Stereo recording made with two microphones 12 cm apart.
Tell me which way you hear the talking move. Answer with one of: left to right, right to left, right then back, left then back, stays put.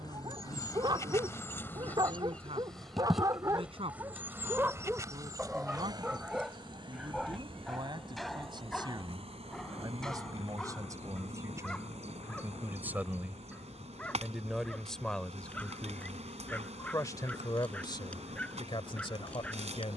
right to left.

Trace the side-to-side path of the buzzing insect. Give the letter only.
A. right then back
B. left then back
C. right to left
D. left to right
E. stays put
D.